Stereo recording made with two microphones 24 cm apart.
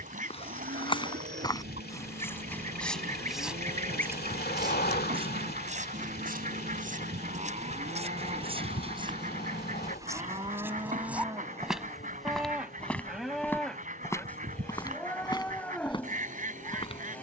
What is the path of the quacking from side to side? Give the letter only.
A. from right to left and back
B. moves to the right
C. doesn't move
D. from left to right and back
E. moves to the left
C.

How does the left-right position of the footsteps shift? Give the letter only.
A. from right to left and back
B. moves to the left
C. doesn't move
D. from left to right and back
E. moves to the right
D.